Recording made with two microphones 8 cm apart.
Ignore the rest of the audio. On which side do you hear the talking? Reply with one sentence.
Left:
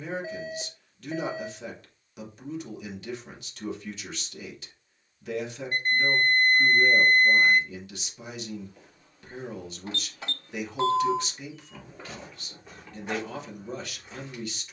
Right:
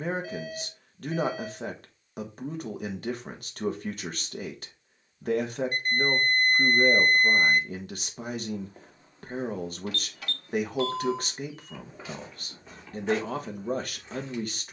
In this clip you hear the talking on the right.